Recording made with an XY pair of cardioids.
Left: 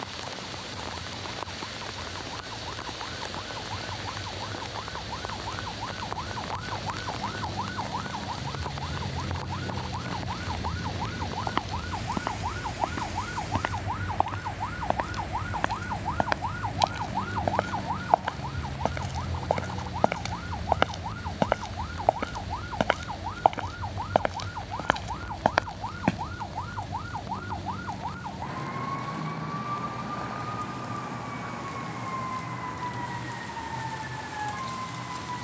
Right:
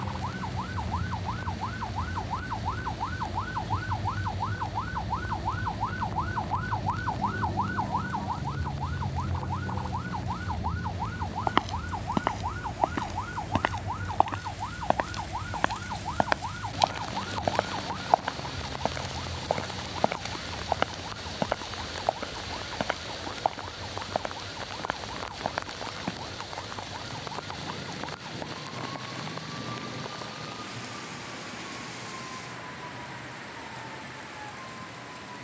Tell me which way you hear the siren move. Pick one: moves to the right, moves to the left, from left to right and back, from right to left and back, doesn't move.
moves to the left.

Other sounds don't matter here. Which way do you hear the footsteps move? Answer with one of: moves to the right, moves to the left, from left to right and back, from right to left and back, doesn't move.
moves to the left.